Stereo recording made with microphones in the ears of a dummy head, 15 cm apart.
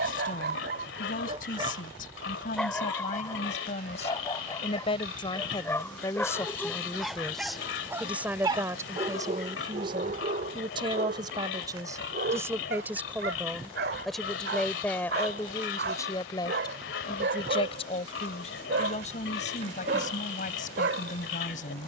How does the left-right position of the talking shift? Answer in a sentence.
You can hear the talking move from left to right and back again.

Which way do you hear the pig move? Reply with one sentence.
You can hear the pig stay in one place.